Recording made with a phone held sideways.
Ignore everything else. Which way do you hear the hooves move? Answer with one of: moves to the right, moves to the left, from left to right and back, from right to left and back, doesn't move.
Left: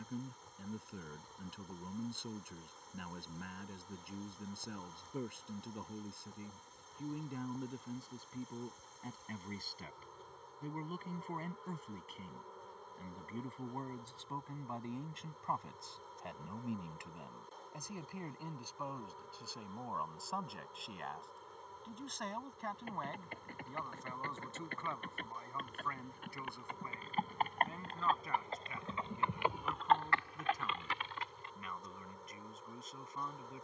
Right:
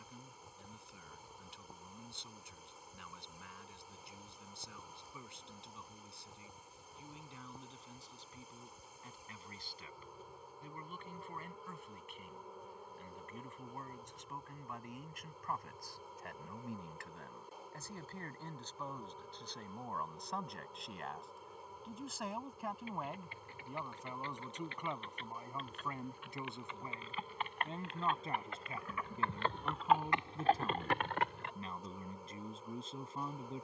moves to the right.